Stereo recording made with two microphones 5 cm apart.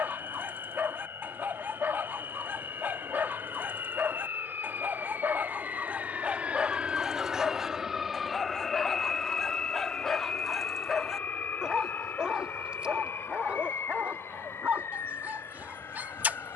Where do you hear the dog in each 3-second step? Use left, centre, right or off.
right, right, centre, centre, right, right.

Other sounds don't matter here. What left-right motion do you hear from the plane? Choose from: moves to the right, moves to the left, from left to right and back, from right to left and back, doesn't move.
moves to the left.